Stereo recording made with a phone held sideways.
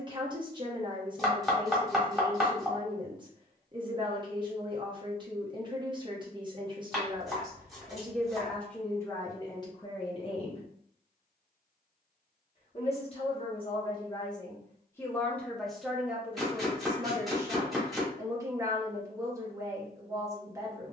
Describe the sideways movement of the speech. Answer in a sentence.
You can hear the speech go left and come back.